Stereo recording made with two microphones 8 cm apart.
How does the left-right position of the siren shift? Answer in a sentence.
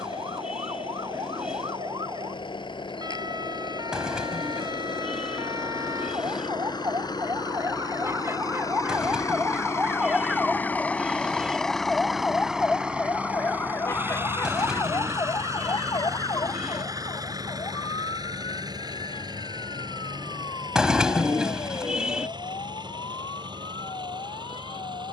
You can hear the siren move to the left.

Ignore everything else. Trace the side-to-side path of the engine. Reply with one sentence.
In this clip you hear the engine move to the right.